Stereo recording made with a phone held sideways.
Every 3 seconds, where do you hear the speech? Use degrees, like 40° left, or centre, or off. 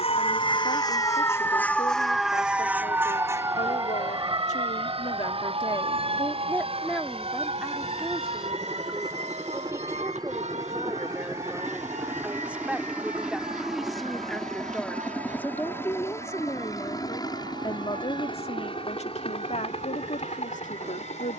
70° left, 50° left, centre, 20° right, centre, 20° left, 60° left.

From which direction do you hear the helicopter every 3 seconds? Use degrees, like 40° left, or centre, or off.
60° right, 50° right, 40° right, 30° right, centre, 20° left, 40° left.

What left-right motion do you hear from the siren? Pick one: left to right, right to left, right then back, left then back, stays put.
left to right.